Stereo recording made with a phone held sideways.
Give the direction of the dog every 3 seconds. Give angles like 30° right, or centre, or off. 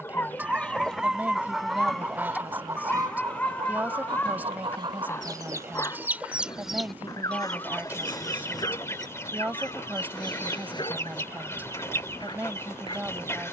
centre, 10° left, 30° left, 30° left, 30° left.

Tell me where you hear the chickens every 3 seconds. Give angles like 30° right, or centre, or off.
centre, 30° right, 10° left, 20° left, 20° left.